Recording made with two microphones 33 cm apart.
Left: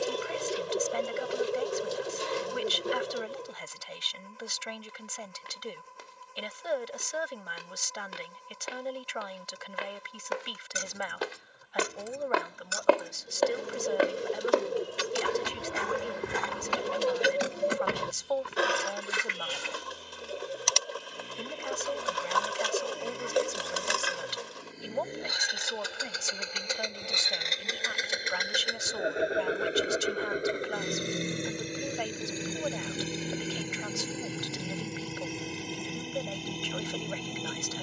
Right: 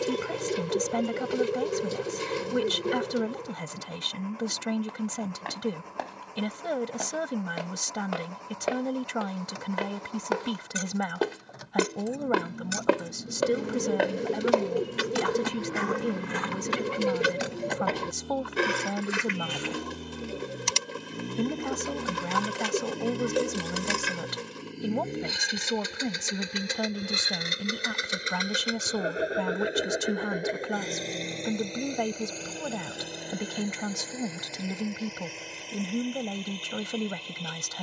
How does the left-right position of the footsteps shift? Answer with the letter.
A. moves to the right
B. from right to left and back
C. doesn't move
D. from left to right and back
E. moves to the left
E.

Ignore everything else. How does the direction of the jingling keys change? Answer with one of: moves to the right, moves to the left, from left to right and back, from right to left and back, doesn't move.
from left to right and back.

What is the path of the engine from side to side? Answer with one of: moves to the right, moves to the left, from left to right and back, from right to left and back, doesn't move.
moves to the left.